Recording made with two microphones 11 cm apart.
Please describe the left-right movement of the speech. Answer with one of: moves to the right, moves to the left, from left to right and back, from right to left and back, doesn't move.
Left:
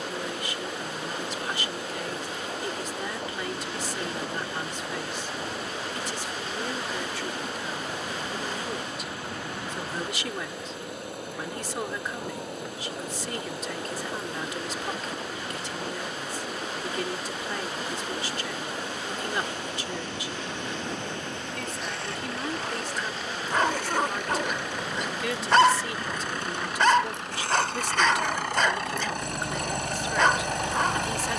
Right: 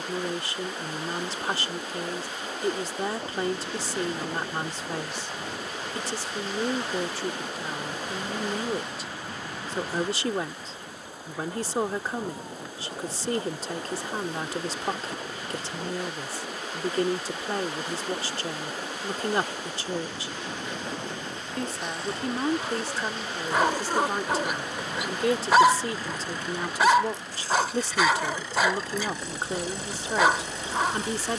doesn't move.